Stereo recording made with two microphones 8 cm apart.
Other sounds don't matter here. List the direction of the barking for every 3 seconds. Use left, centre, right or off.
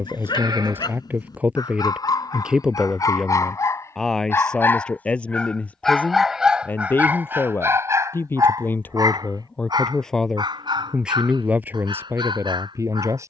left, left, right, right, right.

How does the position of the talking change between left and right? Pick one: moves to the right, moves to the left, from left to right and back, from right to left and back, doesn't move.
from right to left and back.